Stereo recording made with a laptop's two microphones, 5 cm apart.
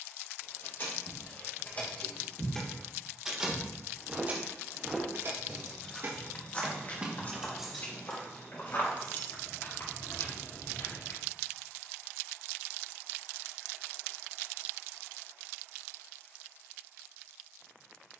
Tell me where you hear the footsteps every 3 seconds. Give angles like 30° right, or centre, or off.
40° right, centre, 40° left, 60° left, off, off.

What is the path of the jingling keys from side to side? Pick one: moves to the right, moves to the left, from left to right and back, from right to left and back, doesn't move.
from left to right and back.